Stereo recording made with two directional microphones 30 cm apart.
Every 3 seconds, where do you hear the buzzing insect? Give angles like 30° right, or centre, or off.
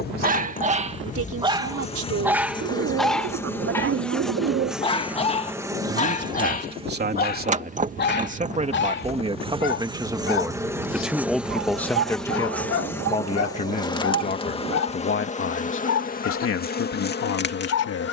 20° left, centre, 20° right, 10° right, 10° left, 30° left.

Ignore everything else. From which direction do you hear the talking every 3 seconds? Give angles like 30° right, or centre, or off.
50° right, 40° right, 30° right, 10° right, 20° left, 50° left.